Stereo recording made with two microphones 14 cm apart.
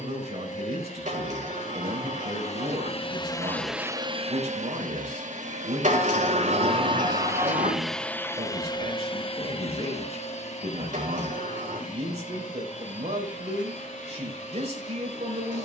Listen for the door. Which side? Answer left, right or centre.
right.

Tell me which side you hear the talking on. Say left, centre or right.
right.